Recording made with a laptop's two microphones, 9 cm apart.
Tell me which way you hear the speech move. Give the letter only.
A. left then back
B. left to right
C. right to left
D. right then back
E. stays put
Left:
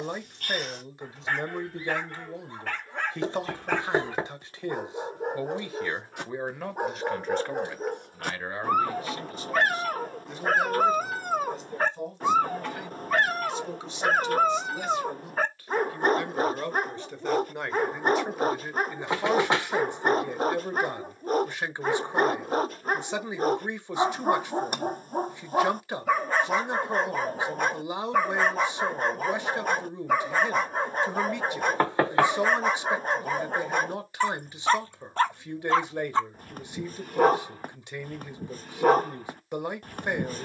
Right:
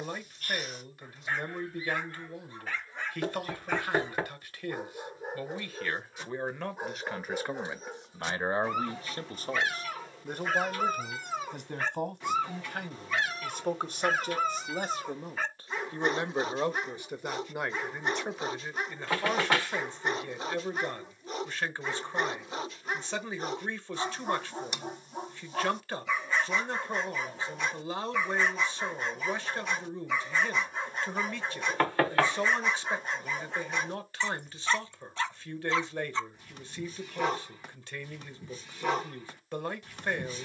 D.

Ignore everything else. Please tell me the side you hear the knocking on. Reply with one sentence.
In this clip you hear the knocking on the left.